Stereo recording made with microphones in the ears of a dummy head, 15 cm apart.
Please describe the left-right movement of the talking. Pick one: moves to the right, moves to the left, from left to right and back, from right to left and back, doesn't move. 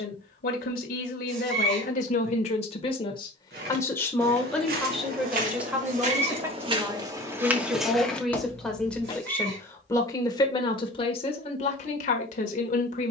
from left to right and back.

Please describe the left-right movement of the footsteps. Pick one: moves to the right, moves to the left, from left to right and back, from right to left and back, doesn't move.
moves to the left.